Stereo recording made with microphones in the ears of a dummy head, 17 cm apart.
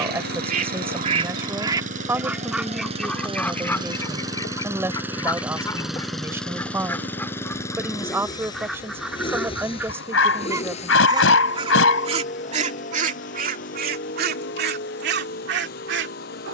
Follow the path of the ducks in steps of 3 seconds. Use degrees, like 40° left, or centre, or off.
30° right, 20° left, 10° left, 10° right, 50° right, 60° right.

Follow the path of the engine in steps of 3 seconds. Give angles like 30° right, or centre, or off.
50° right, 20° right, 10° left, 30° left, 50° left, 50° left.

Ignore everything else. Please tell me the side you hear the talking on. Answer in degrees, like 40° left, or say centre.
10° right.